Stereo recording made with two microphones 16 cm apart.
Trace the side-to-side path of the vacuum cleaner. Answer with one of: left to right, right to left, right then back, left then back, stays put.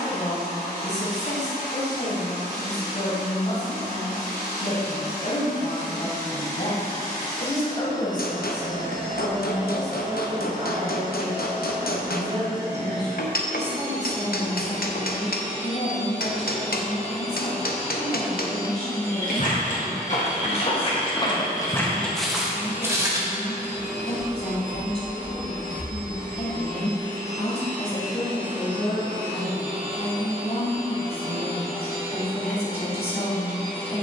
left to right.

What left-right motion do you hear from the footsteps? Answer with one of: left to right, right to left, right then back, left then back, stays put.
left to right.